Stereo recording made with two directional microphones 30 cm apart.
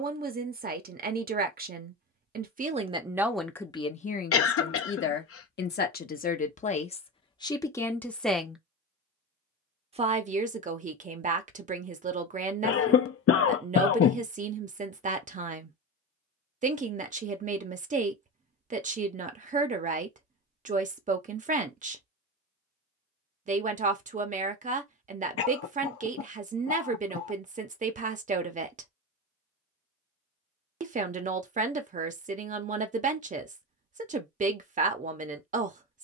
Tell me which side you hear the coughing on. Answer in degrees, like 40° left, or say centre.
50° left.